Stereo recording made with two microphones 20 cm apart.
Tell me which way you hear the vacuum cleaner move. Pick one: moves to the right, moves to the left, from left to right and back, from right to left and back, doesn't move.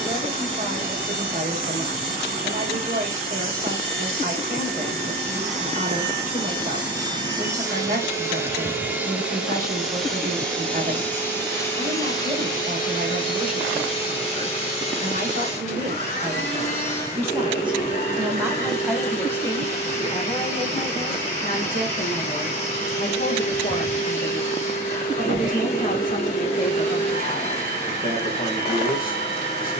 moves to the left.